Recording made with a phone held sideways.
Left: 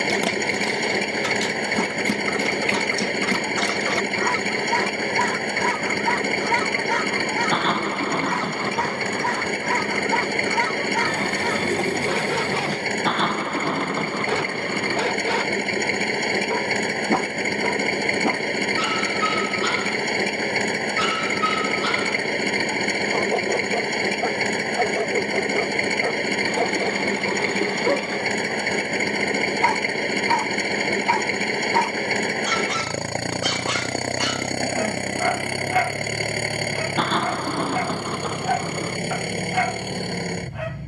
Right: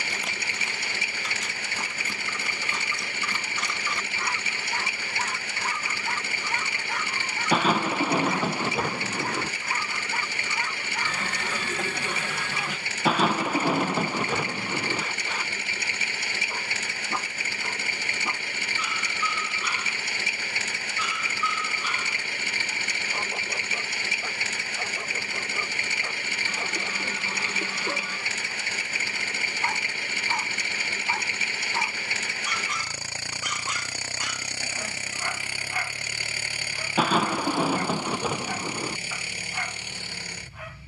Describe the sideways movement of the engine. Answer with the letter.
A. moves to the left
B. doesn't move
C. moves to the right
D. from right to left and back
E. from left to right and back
B.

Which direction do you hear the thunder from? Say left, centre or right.
centre.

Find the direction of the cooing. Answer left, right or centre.
left.